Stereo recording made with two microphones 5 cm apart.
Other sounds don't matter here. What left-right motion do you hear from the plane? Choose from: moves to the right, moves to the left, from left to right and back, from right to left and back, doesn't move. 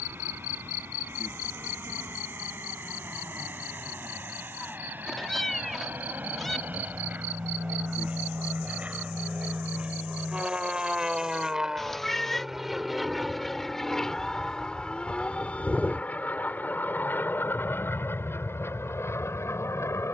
moves to the left.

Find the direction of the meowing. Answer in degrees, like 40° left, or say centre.
10° left.